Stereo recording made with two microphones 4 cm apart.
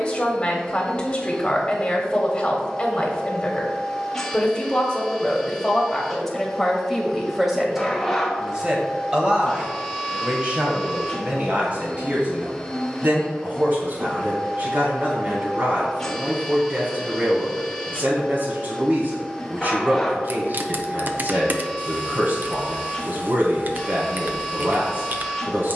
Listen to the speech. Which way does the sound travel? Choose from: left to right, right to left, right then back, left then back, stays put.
left to right.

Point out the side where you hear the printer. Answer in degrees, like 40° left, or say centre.
10° left.